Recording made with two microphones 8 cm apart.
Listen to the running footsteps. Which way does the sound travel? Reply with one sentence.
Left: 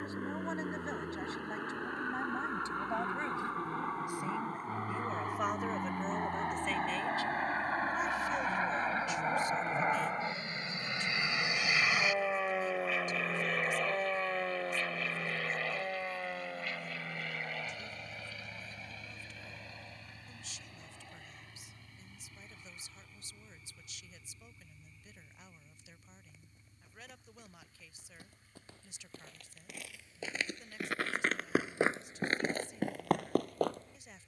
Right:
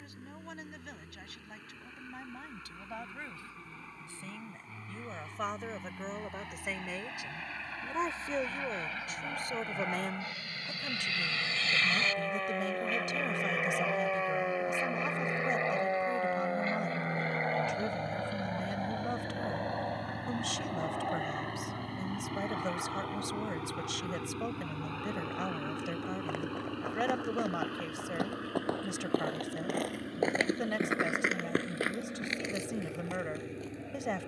In this clip you hear the running footsteps move from right to left.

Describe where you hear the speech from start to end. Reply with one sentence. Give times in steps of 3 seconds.
In this clip you hear the speech on the left from 0 s, in the centre from 3 s and on the right from 6 s.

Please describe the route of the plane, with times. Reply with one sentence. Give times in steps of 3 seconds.
In this clip you hear the plane on the left from 0 s, in the centre from 12 s and on the right from 15 s.